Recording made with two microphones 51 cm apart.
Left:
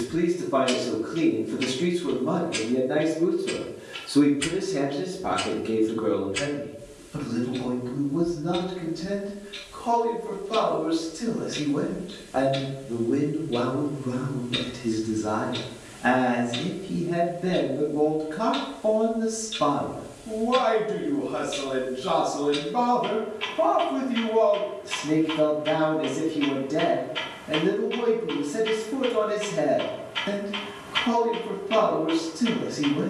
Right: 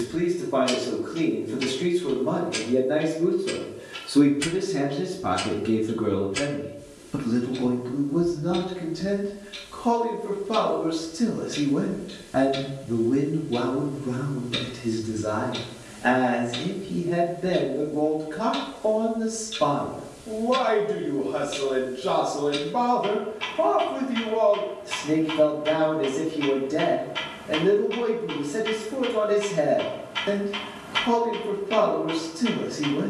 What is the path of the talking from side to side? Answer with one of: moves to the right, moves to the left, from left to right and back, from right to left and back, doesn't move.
from left to right and back.